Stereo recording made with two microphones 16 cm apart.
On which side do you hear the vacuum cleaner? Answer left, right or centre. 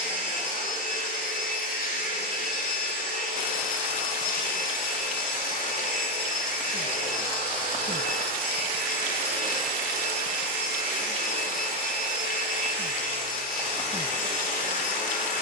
left.